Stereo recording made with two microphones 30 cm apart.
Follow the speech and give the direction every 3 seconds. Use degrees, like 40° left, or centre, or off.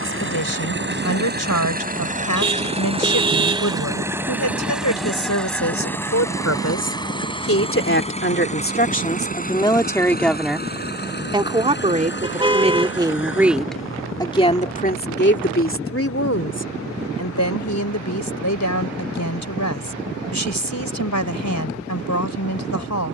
70° left, 70° left, 50° left, centre, centre, 50° left, 70° left, 70° left.